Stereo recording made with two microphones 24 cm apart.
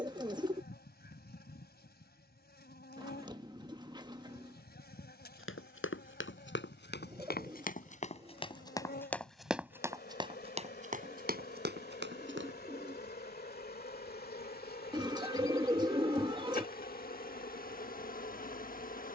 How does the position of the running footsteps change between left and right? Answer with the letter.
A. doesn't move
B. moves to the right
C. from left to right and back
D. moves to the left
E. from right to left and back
B.